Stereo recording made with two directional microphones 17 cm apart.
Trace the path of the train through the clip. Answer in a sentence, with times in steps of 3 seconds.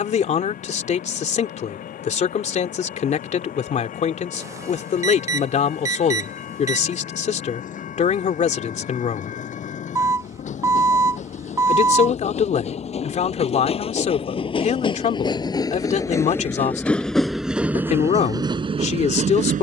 You can hear the train on the left from 0 s, in the centre from 15 s and on the right from 18 s.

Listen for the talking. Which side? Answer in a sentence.
In this clip you hear the talking on the left.